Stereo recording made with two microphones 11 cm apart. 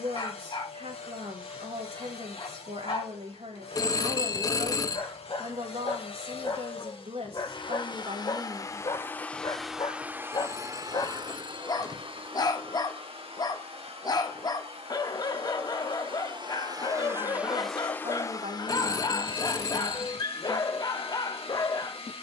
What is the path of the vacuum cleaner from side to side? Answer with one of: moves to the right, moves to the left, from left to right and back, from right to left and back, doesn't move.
from left to right and back.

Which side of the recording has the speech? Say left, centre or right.
right.